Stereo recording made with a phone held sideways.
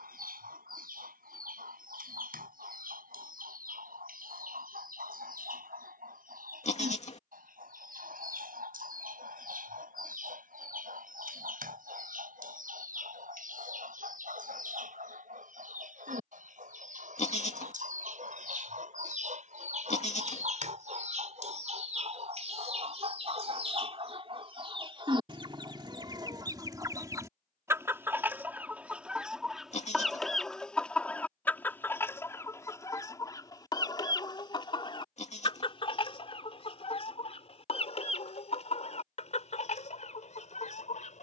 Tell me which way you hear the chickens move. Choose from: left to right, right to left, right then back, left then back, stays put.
right to left.